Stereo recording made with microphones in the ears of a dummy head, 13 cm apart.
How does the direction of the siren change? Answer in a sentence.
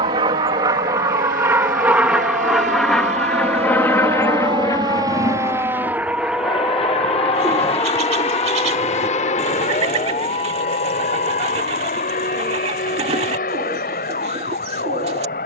You can hear the siren go from the right side to the left.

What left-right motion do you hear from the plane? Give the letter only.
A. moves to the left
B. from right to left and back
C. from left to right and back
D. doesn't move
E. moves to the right
A.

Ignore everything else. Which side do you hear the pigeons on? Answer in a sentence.
You can hear the pigeons on the right.